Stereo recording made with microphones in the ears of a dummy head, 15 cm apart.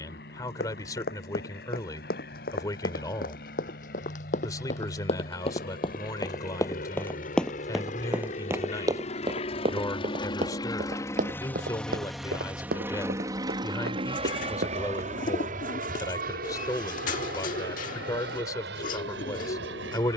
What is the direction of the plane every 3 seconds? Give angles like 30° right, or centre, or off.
70° left, 70° left, 50° left, 30° left, 20° right, 50° right, 70° right.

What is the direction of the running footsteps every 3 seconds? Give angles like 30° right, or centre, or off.
60° left, 50° left, centre, 40° right, 60° right, off, off.